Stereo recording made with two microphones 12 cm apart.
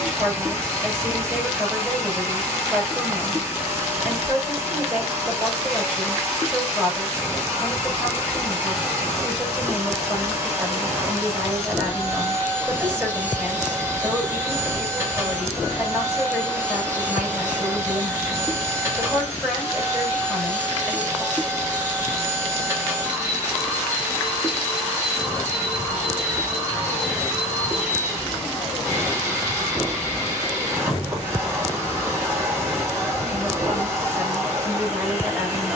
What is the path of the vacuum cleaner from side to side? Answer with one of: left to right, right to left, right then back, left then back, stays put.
stays put.